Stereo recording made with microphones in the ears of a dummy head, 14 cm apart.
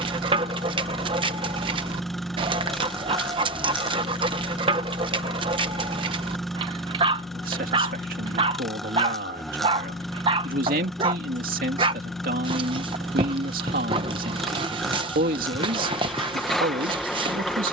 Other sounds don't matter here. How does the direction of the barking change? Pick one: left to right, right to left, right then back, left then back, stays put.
stays put.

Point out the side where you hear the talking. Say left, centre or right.
right.